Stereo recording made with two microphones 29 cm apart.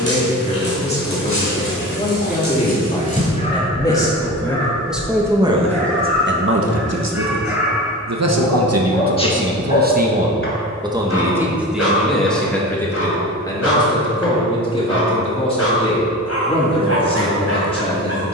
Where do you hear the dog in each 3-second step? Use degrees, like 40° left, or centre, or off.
40° left, 20° left, centre, 40° left, 60° left, 60° left.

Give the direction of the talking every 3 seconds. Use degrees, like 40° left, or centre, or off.
20° left, centre, 60° right, 20° right, 10° left, 20° left.